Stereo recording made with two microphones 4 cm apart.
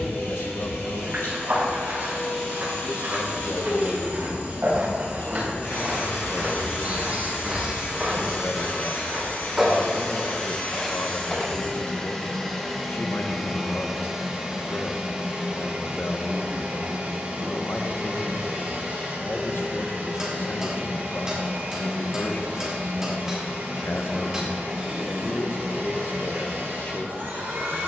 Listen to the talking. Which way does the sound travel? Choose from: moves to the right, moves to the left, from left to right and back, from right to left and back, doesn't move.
doesn't move.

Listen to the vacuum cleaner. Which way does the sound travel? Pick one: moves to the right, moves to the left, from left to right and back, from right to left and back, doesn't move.
moves to the right.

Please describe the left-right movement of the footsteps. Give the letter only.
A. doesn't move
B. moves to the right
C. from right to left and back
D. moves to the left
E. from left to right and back
D.